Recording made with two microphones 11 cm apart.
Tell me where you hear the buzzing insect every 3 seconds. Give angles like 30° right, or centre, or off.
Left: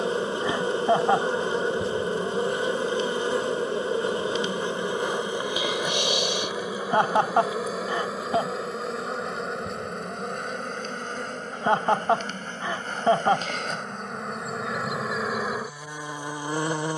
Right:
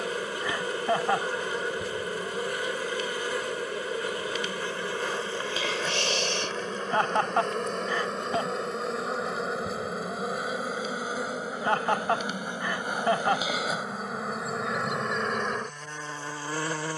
30° left, 20° left, 10° left, 10° right, 10° right, 10° left.